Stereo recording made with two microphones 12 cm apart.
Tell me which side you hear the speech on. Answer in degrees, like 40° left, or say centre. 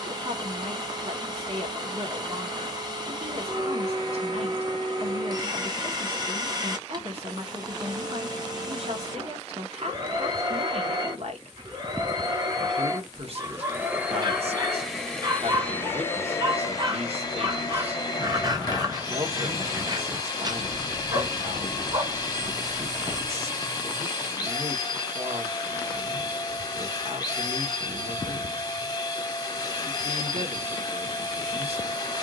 60° right.